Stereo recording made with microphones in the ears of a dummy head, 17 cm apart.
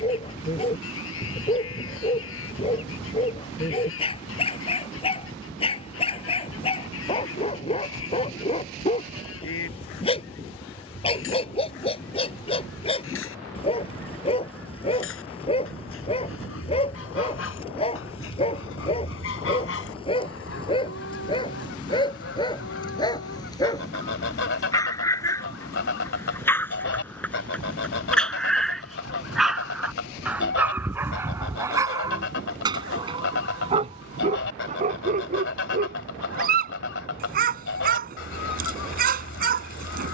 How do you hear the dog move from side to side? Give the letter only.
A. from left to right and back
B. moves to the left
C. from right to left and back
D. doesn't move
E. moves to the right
E.